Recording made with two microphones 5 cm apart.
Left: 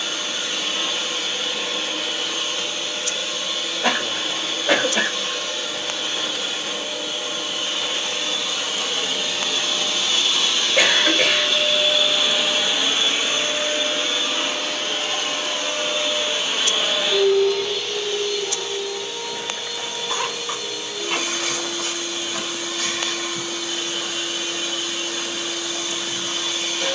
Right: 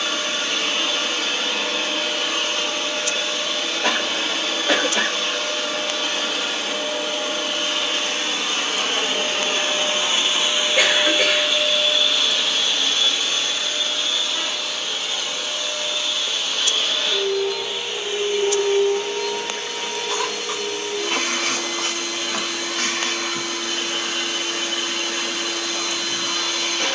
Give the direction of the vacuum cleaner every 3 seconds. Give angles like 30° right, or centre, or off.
60° right, 60° right, 60° right, 20° right, 20° left, 20° left, 50° right, 50° right, 50° right.